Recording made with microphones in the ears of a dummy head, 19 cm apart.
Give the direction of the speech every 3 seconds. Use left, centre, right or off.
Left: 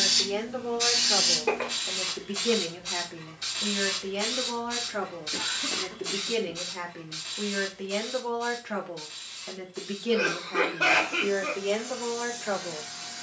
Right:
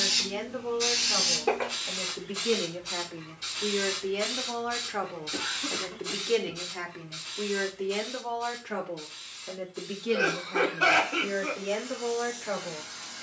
left, centre, centre, left, left.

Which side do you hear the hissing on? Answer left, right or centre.
left.